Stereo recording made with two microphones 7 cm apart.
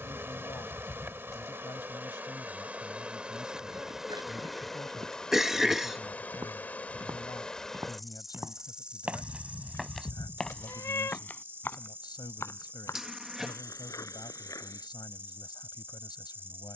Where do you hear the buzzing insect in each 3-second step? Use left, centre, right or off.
right, centre, centre, right, right, right.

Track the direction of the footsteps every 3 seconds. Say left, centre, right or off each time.
off, right, right, centre, left, off.